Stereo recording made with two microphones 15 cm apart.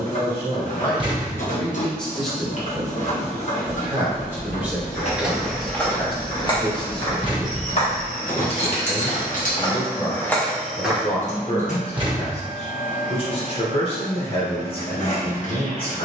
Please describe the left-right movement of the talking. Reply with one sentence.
You can hear the talking move from left to right and back again.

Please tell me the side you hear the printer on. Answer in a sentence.
You can hear the printer on the left.